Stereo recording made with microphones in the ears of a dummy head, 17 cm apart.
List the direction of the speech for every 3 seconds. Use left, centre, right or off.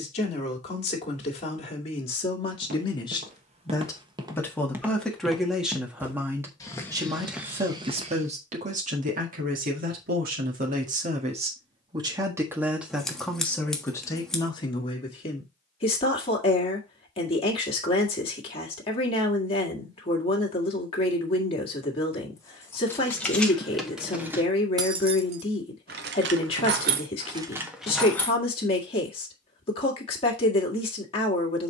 left, centre, right, right, centre, left, left, left, left, left, left.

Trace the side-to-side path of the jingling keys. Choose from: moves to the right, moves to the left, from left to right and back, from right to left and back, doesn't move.
from left to right and back.